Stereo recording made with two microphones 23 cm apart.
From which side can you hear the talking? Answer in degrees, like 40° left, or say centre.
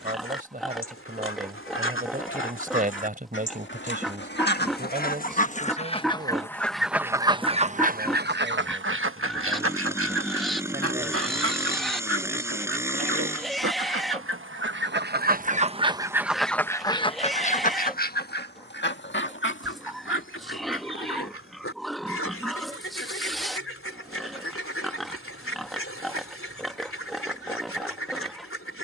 40° right.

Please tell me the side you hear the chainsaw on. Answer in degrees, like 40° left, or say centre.
10° right.